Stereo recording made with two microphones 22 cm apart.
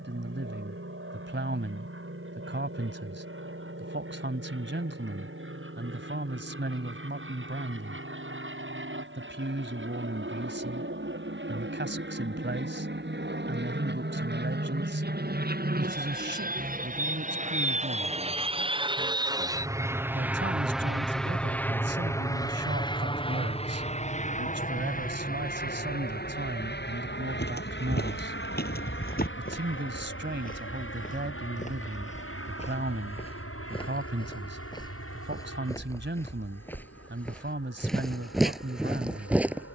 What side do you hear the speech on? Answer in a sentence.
In this clip you hear the speech on the right.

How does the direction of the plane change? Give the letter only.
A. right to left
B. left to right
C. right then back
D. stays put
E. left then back
A.